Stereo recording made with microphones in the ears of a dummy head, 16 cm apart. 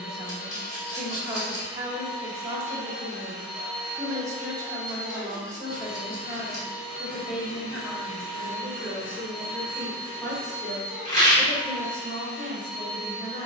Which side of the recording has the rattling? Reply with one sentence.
In this clip you hear the rattling on the left.